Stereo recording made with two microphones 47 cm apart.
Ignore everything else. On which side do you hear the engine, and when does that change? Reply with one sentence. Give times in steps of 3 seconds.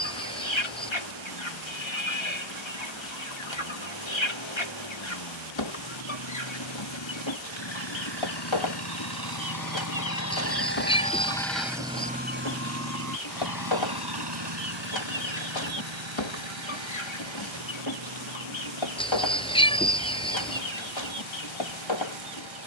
You can hear the engine on the left from 0 s and on the right from 12 s.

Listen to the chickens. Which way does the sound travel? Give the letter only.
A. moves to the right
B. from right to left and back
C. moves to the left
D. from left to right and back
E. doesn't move
E.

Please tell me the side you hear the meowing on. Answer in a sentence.
You can hear the meowing in the centre.